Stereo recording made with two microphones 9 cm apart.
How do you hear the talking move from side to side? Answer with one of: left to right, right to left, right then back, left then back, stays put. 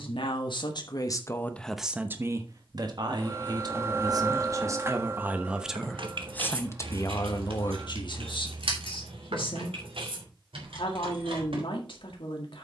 right then back.